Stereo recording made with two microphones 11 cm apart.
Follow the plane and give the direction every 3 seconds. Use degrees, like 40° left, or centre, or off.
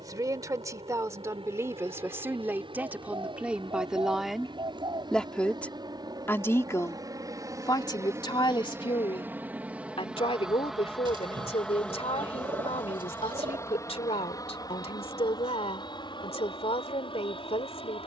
60° right, 50° right, 30° right, centre, 20° left, 50° left.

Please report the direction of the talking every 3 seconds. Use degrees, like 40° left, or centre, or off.
30° right, centre, 40° left, 60° left, 70° left, 70° left.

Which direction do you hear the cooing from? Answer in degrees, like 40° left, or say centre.
50° right.